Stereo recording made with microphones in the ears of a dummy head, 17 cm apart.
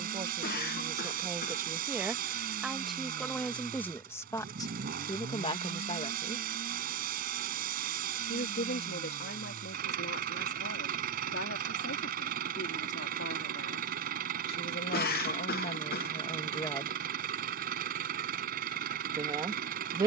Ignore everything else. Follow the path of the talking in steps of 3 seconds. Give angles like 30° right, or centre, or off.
20° right, 20° left, 50° left, 70° left, 70° left, 30° left, 20° right.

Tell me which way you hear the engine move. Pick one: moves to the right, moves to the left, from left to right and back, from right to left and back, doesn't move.
doesn't move.